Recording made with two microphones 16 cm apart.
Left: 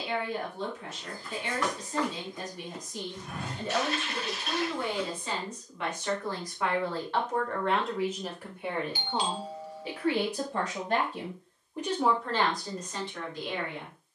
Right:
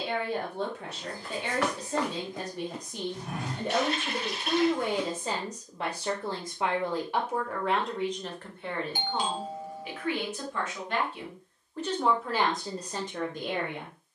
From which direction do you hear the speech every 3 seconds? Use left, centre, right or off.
right, right, centre, left, right.